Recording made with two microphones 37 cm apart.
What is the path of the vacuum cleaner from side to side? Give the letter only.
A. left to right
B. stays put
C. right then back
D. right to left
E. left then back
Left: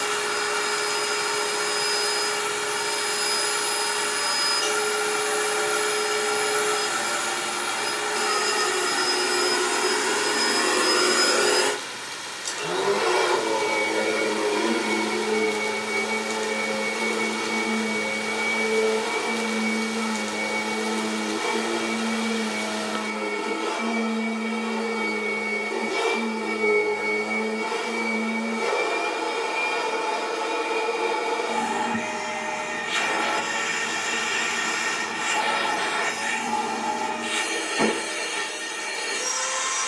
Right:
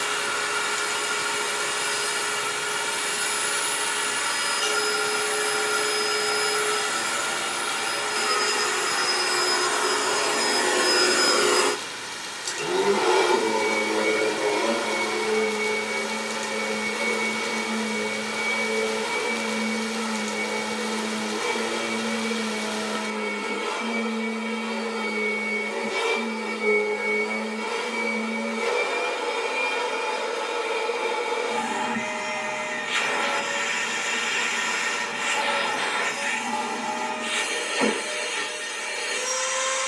C.